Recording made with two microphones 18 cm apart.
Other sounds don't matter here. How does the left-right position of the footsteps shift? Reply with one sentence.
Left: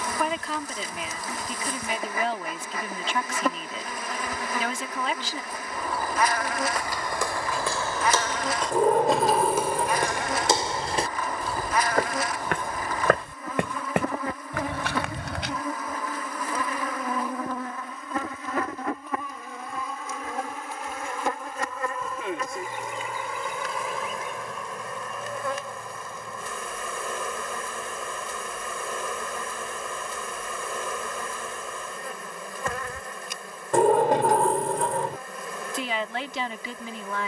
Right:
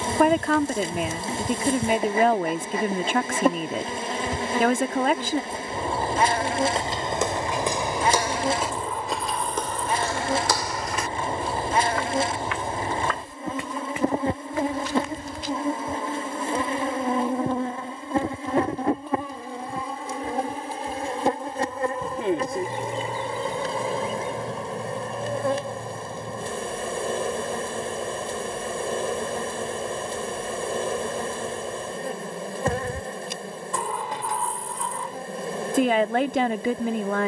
In this clip you hear the footsteps travel towards the left.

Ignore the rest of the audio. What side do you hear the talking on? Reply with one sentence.
In this clip you hear the talking on the right.